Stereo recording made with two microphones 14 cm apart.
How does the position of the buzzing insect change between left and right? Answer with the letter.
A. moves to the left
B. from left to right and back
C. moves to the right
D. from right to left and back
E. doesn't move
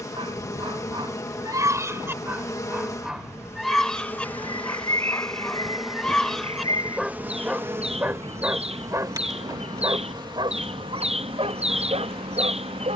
C.